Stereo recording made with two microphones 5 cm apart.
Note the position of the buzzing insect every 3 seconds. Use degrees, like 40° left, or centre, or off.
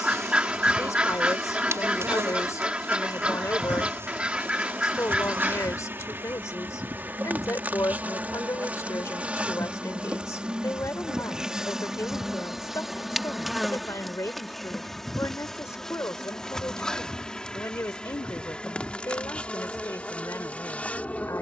60° right, 50° right, 30° right, 20° right, centre, 10° left, 20° left.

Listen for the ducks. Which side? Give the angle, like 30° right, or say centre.
20° right.